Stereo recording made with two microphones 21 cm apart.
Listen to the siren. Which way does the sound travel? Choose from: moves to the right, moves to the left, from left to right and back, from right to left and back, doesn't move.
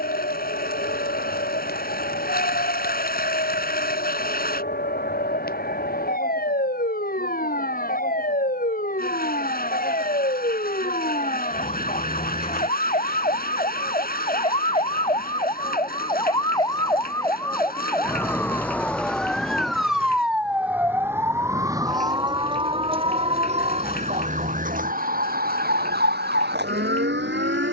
moves to the right.